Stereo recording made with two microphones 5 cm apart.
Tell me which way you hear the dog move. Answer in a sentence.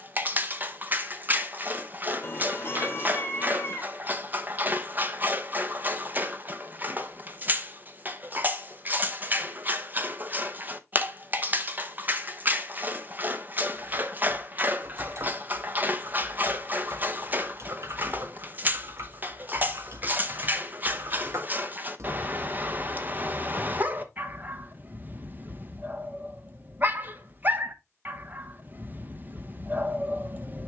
You can hear the dog stay put.